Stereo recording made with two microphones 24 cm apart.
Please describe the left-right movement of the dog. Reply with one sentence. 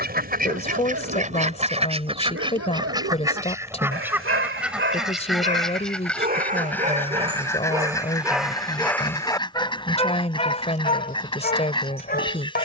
You can hear the dog move to the left.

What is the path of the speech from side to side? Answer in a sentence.
In this clip you hear the speech stay put.